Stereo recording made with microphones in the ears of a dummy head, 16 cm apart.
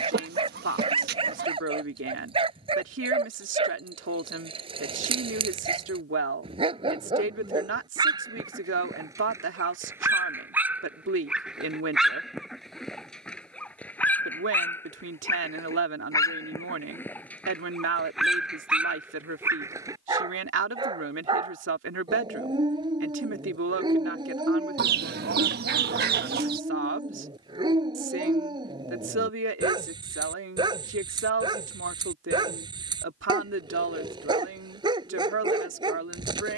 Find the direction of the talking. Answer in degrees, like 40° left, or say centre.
80° right.